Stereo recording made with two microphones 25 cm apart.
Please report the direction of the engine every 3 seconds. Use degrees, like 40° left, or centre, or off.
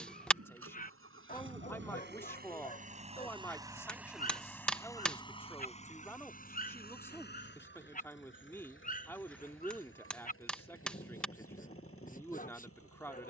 50° right, centre, 40° left, 60° left, 60° left.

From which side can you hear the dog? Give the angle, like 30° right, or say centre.
30° left.